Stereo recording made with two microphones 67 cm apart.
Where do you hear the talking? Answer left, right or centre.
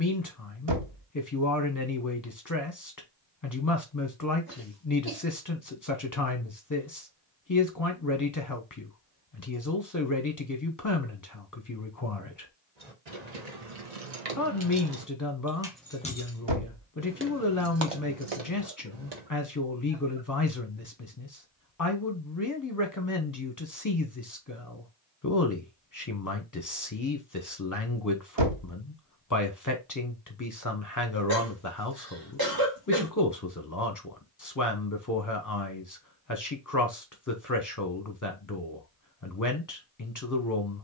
left.